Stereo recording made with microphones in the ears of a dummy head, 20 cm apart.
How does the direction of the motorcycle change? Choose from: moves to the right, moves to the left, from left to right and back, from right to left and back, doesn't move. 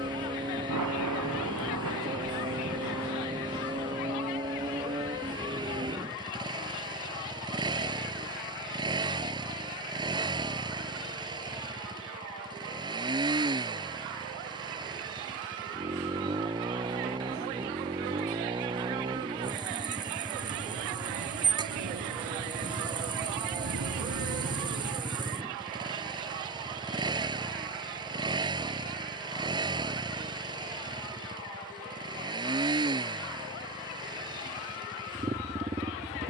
doesn't move.